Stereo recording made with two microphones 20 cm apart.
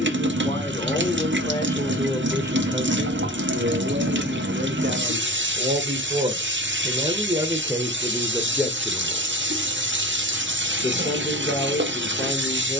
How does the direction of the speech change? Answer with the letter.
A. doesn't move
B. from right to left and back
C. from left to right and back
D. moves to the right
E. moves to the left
C.